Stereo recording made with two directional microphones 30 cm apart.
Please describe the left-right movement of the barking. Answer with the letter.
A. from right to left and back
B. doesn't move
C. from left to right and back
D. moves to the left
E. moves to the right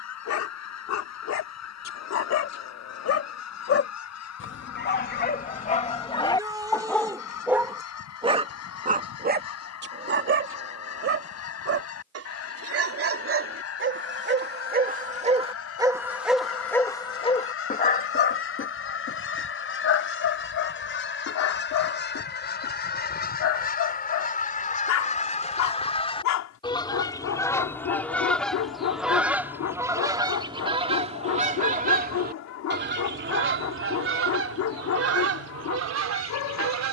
C.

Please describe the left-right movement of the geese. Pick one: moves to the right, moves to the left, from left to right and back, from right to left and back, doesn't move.
moves to the right.